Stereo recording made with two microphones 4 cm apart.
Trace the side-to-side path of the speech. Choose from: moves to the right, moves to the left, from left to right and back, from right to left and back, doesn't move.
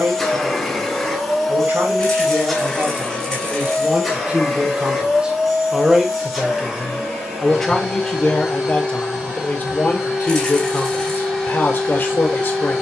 moves to the left.